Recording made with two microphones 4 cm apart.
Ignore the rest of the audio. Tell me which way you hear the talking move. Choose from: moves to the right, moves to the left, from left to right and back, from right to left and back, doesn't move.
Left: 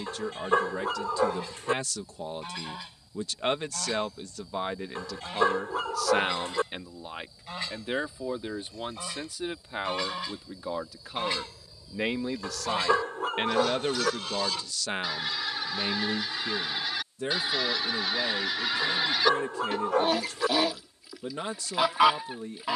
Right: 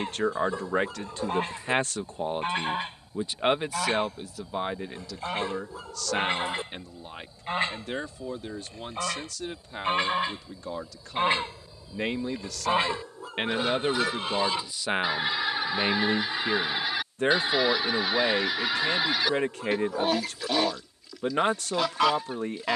from right to left and back.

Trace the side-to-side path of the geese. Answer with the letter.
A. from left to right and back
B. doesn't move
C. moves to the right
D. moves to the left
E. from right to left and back
D.